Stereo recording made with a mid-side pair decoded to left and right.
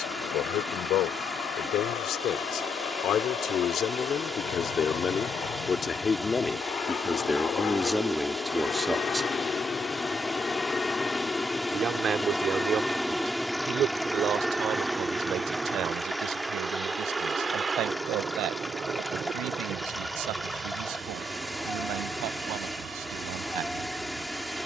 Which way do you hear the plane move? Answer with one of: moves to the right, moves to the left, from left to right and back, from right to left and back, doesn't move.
moves to the right.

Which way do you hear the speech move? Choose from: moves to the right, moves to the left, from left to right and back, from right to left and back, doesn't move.
moves to the right.